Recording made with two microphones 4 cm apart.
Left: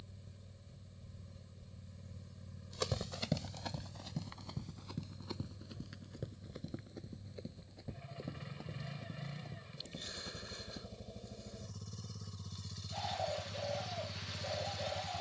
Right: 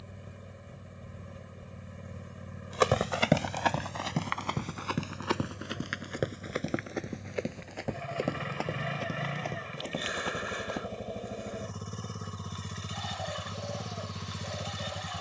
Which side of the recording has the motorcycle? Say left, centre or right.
right.